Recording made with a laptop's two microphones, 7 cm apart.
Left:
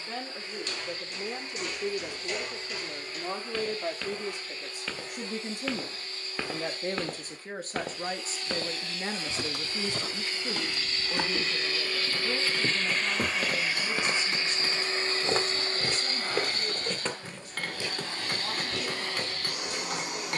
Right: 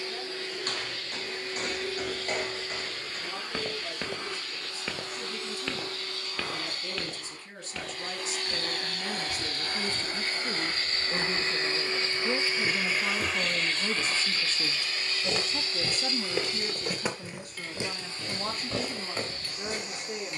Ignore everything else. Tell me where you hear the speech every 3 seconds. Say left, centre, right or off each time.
left, left, left, centre, right, right, right.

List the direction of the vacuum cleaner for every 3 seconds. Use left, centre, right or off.
right, right, right, right, centre, left, left.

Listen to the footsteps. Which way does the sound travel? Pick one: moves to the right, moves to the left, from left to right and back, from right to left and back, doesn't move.
from right to left and back.